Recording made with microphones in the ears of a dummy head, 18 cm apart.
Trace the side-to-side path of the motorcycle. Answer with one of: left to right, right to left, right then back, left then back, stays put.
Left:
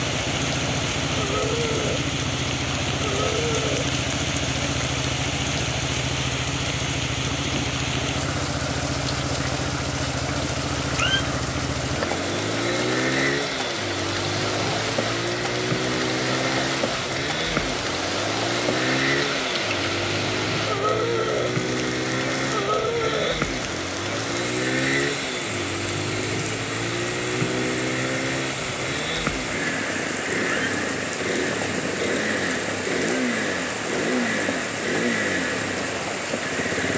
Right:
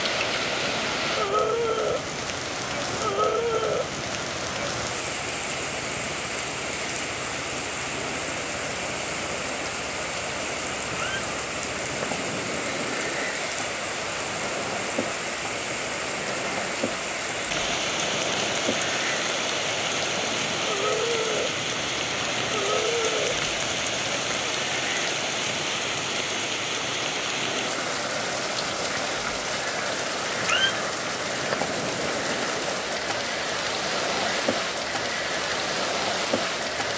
stays put.